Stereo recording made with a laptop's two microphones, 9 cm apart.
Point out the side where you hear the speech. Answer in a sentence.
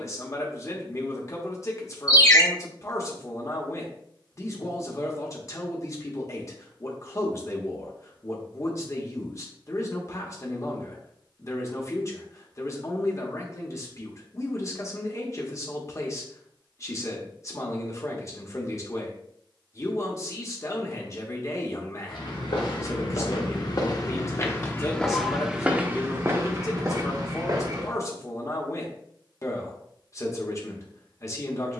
In this clip you hear the speech on the left.